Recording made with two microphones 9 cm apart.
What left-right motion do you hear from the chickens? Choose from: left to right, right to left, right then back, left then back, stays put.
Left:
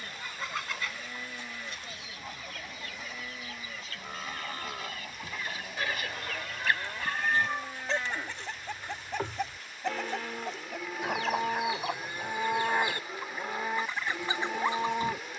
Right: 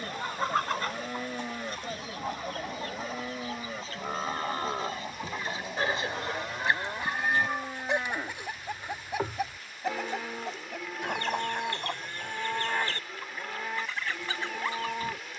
right to left.